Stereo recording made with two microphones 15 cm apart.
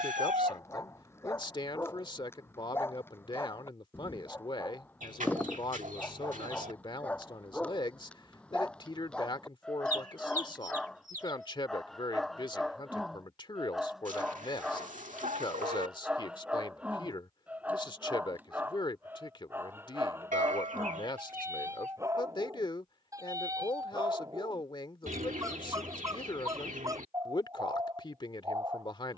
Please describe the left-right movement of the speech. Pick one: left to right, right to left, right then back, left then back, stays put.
stays put.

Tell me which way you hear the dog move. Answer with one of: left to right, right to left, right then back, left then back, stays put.
left to right.